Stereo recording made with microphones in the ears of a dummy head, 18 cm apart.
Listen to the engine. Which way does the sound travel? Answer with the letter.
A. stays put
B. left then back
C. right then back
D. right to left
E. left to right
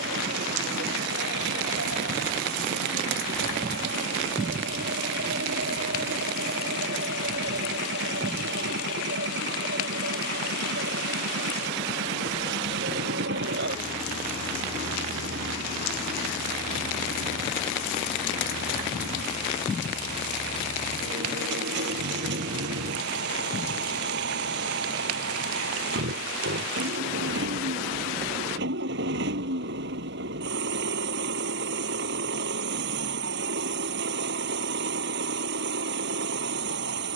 A.